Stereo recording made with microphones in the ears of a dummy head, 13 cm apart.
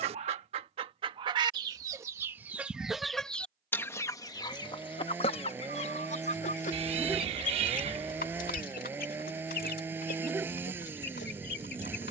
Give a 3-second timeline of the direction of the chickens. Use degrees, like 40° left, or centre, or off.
30° right, 30° left, 60° left, 70° left.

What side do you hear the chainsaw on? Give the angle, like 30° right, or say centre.
10° right.